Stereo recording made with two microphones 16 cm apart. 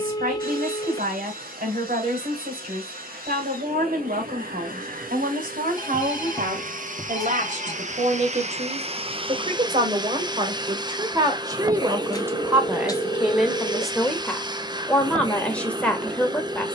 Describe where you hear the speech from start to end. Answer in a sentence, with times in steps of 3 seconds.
You can hear the speech on the right from 0 s and in the centre from 12 s.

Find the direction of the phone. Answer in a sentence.
You can hear the phone on the left.